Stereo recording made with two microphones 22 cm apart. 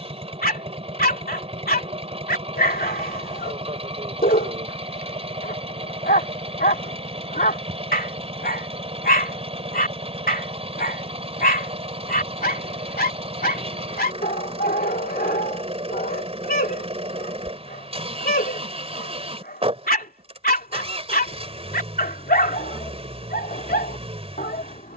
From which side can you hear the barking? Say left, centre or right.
left.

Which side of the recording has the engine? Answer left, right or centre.
right.